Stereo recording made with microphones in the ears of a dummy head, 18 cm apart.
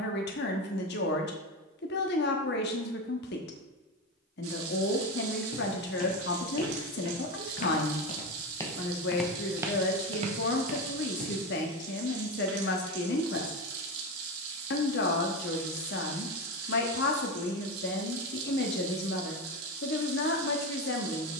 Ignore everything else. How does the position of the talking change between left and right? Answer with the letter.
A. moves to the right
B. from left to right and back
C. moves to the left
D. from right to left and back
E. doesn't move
E.